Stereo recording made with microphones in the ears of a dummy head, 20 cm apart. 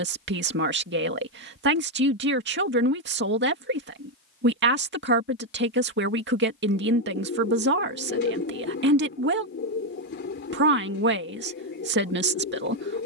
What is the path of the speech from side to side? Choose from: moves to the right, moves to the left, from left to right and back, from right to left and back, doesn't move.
doesn't move.